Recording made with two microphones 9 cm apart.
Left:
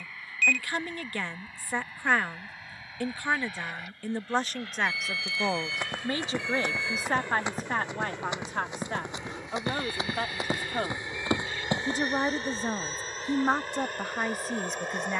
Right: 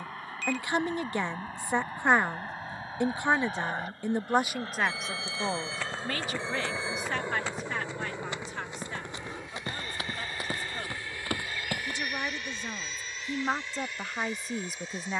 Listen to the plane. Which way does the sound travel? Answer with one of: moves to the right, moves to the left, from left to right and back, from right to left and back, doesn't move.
moves to the left.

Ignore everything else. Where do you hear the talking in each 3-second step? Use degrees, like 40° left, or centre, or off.
20° right, 10° right, 40° left, 50° left, 20° left.